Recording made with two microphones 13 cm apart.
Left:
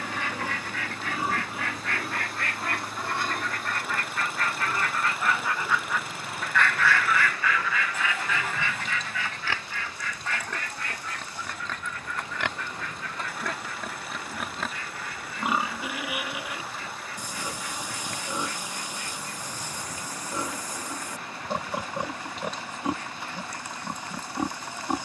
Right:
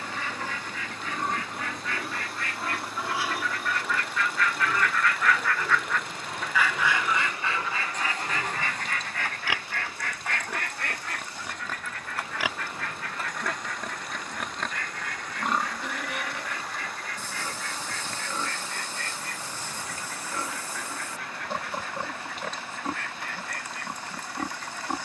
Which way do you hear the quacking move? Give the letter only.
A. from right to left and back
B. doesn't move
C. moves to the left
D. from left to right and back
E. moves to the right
E.